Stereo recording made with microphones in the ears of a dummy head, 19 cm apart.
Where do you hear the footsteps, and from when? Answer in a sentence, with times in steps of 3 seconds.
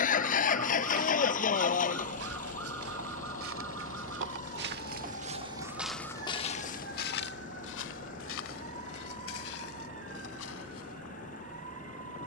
In this clip you hear the footsteps on the right from 0 s and on the left from 6 s.